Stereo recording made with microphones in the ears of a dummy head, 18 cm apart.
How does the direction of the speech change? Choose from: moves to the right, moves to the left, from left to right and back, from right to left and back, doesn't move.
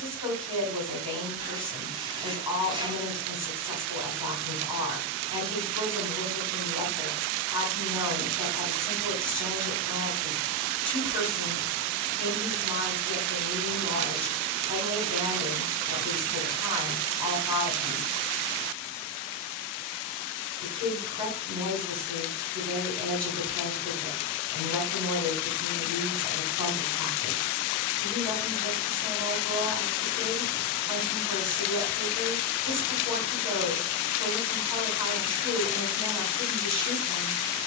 doesn't move.